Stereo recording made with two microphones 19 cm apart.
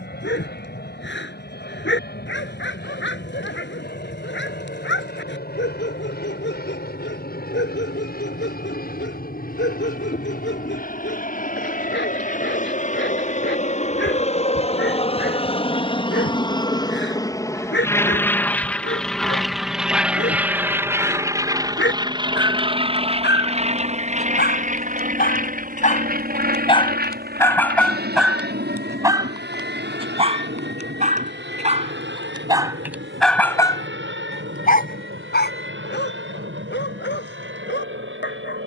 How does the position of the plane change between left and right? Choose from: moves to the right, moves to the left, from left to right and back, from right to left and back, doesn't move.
moves to the right.